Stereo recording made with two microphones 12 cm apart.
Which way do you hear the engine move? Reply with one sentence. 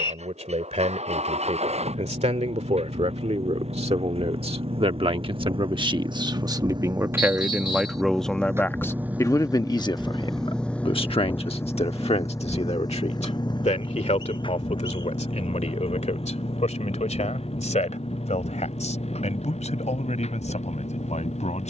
In this clip you hear the engine move from right to left.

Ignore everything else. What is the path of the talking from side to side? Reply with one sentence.
You can hear the talking travel towards the left.